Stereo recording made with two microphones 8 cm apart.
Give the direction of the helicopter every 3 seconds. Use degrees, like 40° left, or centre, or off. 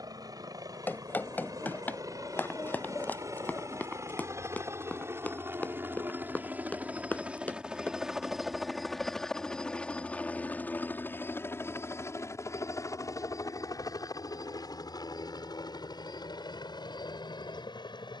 50° right, 40° right, 10° right, 20° left, 40° left, 60° left.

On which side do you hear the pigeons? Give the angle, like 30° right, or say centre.
30° left.